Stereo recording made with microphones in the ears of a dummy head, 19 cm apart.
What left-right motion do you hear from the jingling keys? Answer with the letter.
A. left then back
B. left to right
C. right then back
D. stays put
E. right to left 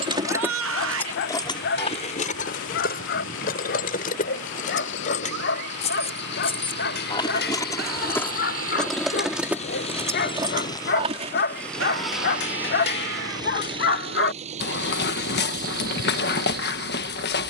A.